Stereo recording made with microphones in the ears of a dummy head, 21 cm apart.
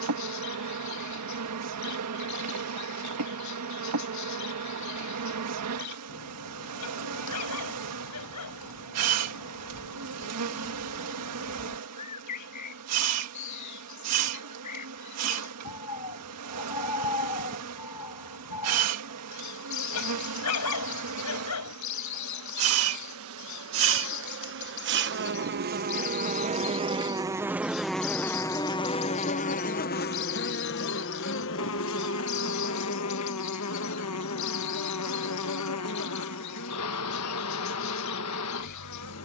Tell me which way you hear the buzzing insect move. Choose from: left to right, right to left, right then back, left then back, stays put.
right to left.